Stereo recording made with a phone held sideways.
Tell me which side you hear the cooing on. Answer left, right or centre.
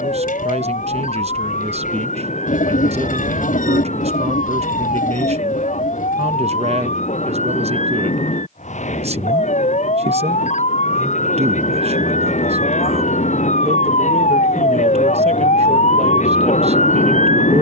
left.